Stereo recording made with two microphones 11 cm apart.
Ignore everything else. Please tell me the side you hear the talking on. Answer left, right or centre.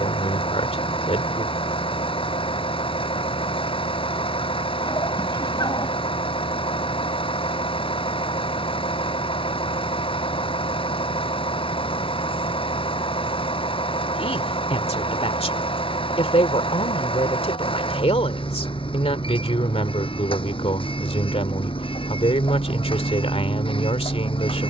left.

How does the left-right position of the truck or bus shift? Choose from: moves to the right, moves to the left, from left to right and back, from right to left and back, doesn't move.
doesn't move.